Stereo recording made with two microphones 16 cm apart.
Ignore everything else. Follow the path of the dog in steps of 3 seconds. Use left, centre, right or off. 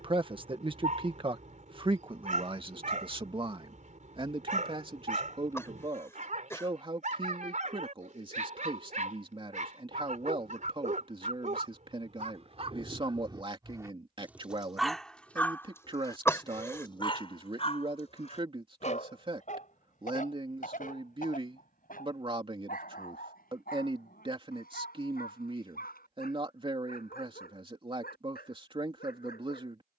right, right, right, right, right, left, left, left, left, left.